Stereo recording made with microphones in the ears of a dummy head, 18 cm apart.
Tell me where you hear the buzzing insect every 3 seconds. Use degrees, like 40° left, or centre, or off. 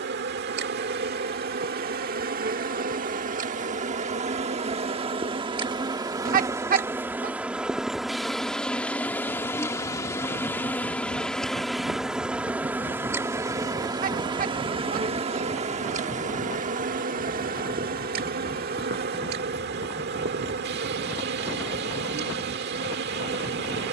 50° right, 30° right, 10° right, 10° left, 10° right, 40° right, 50° right, 50° right.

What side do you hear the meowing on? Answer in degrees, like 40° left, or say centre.
40° right.